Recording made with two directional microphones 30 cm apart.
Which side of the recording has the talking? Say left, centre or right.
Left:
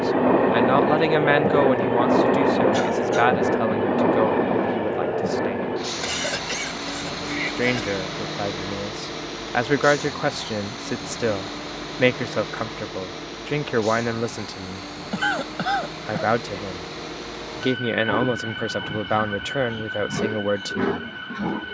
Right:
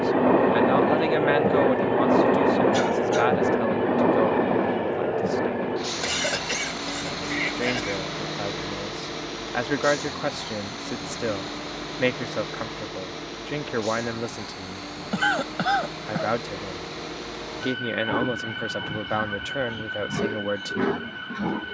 left.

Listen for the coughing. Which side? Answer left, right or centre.
centre.